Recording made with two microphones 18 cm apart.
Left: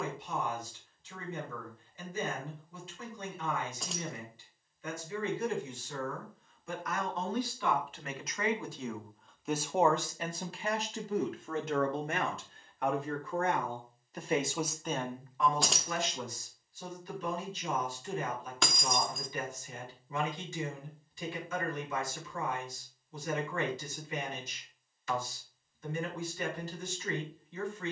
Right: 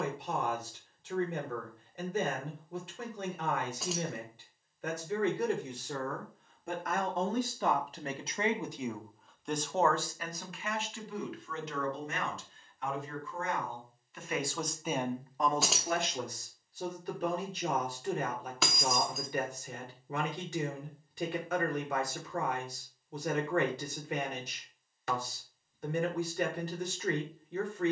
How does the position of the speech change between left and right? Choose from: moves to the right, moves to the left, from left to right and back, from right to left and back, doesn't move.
from right to left and back.